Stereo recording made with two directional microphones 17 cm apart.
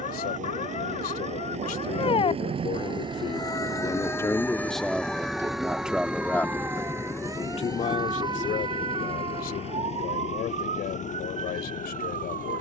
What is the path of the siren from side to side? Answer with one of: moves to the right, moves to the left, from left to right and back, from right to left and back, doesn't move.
moves to the right.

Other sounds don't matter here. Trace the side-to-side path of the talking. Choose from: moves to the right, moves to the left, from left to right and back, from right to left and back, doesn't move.
from left to right and back.